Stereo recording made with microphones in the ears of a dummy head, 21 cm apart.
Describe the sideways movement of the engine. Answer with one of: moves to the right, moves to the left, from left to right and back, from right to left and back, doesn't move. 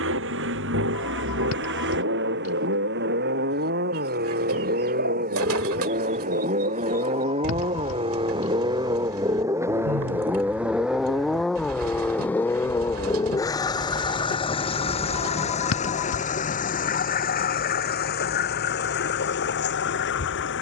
moves to the left.